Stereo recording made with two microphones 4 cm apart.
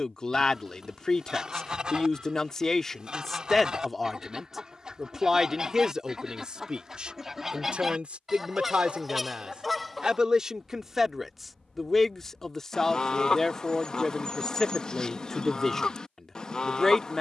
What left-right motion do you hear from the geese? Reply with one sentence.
You can hear the geese go from the right side to the left.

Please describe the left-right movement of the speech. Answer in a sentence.
In this clip you hear the speech move from left to right and back again.